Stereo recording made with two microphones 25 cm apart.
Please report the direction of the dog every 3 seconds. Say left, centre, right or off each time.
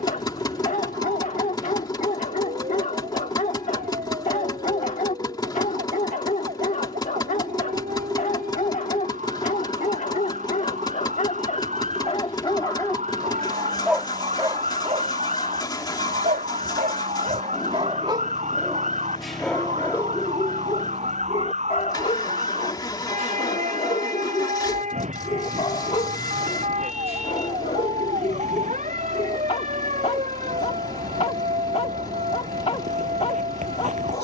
left, left, left, left, centre, right, centre, left, left, left, left, left.